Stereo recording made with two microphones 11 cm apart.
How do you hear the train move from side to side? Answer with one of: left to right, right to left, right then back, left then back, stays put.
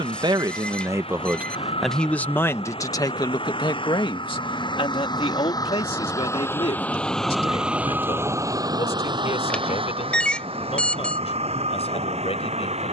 left to right.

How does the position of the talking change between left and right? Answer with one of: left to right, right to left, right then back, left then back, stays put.
right to left.